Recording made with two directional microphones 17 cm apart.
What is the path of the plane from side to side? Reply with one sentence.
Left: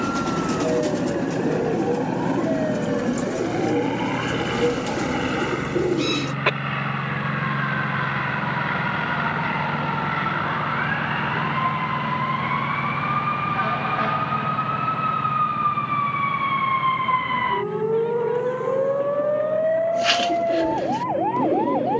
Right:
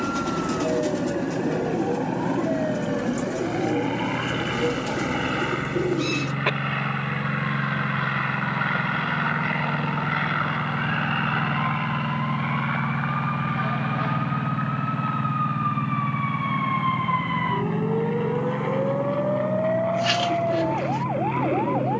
In this clip you hear the plane move to the right.